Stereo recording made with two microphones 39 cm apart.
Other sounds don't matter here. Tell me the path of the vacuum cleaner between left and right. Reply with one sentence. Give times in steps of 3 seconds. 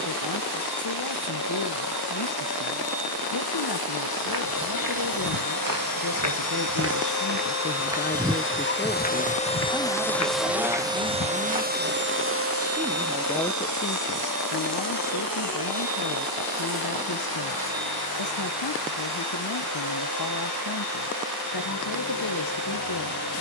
In this clip you hear the vacuum cleaner on the left from 0 s, in the centre from 9 s and on the right from 12 s.